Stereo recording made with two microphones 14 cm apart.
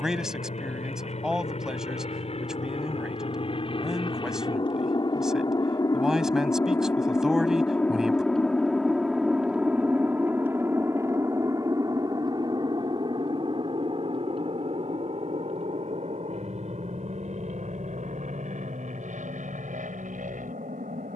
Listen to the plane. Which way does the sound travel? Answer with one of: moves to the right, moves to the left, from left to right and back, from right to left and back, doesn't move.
moves to the right.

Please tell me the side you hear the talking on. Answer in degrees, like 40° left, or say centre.
centre.